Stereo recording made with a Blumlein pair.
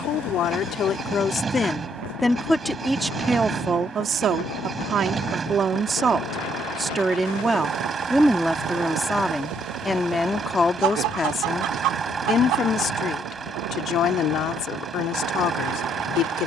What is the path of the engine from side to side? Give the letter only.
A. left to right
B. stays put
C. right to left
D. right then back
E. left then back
B.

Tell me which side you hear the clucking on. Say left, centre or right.
right.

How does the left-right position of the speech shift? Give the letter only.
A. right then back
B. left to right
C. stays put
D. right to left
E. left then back
A.